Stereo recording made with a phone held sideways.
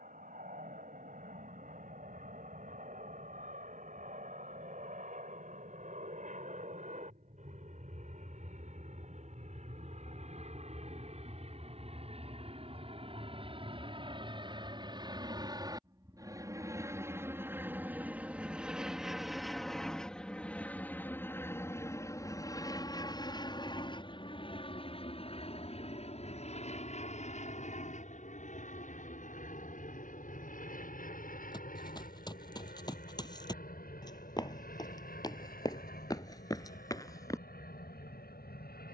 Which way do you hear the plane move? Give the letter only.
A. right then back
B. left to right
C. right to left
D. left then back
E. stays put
C.